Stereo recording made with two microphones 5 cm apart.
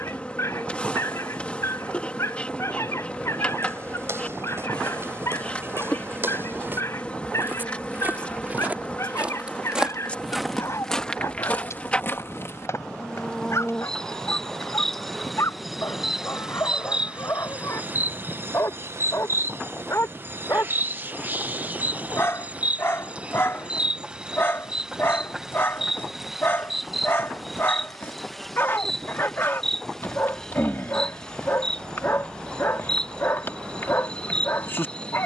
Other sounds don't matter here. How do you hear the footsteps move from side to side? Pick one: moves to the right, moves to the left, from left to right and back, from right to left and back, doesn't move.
moves to the left.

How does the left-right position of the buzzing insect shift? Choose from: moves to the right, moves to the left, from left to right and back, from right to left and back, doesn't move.
from left to right and back.